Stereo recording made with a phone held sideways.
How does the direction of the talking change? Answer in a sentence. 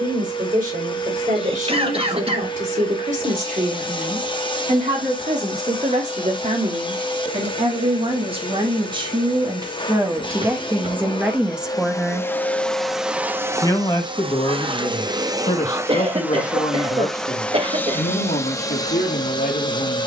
In this clip you hear the talking go from the right side to the left.